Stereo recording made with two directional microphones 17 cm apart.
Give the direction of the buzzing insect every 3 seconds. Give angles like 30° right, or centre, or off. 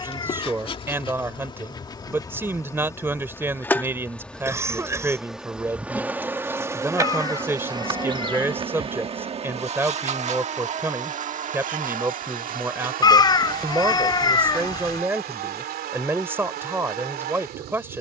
30° left, centre, 20° right, 40° right, 60° right, 70° right.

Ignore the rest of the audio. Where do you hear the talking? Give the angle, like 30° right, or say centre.
10° right.